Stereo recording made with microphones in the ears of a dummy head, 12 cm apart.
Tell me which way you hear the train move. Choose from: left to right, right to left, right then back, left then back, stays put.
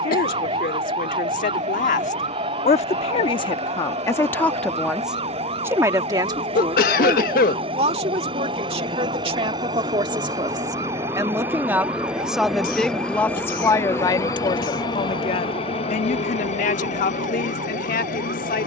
right to left.